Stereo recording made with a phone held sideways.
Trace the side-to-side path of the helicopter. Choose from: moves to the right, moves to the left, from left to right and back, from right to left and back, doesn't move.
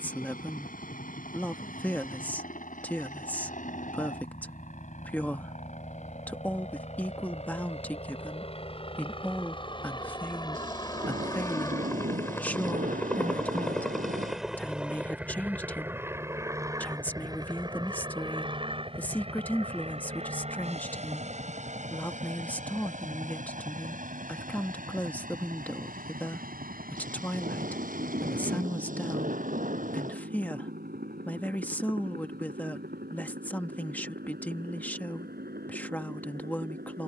moves to the right.